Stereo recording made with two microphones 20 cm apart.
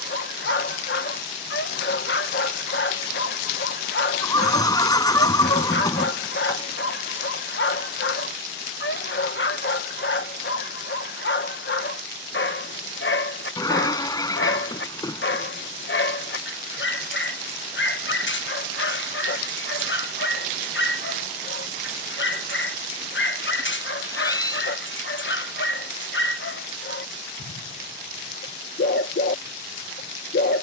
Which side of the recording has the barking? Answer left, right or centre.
left.